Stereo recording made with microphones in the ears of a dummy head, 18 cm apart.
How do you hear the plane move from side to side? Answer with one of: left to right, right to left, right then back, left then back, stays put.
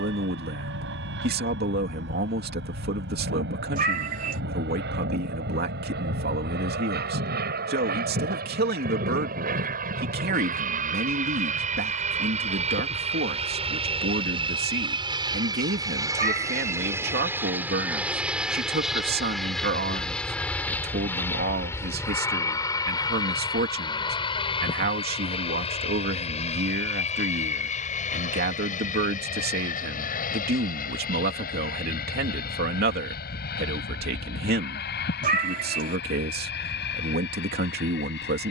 right to left.